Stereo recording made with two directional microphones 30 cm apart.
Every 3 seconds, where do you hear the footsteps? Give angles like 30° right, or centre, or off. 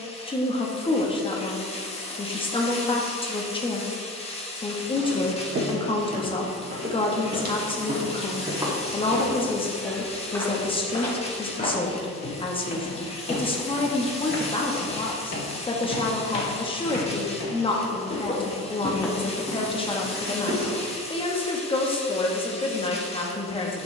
off, 50° right, 30° right, 10° left, 40° left, 50° left, 10° right, off.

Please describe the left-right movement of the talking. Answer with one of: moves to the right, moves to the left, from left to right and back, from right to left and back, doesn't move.
doesn't move.